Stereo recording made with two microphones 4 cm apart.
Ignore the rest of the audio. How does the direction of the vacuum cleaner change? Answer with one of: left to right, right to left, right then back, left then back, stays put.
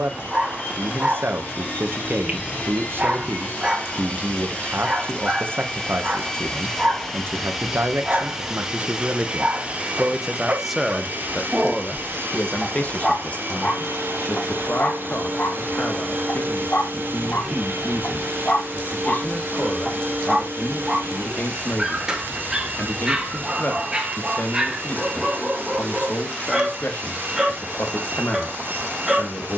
left to right.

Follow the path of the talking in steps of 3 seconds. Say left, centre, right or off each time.
right, right, right, centre, left, left, left, left, left, left.